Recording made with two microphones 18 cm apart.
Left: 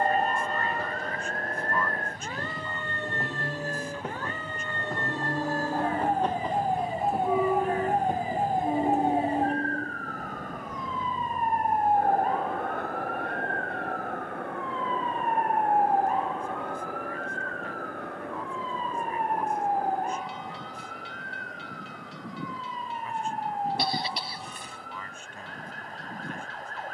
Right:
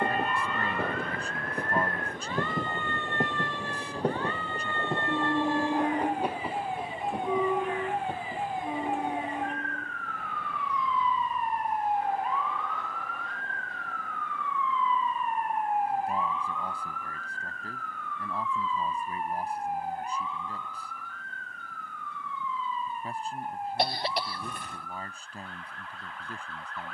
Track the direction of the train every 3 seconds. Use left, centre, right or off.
right, right, centre, left, left, left, left, left, left.